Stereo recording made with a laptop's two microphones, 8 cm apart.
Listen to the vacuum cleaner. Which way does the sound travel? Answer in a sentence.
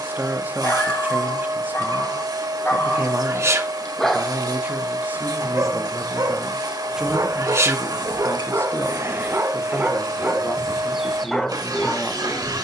You can hear the vacuum cleaner stay put.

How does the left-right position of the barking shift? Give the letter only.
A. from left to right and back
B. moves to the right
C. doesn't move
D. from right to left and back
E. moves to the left
A.